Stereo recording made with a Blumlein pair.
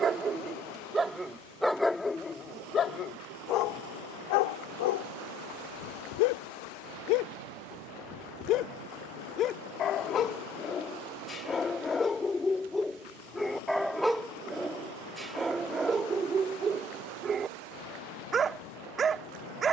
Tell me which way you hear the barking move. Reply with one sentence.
In this clip you hear the barking go left and come back.